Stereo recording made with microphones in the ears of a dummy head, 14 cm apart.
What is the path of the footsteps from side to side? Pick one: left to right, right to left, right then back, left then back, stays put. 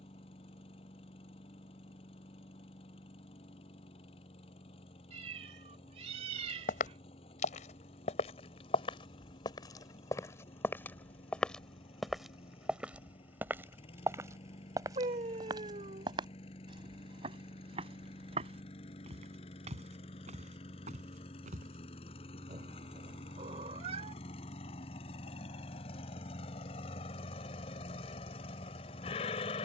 left to right.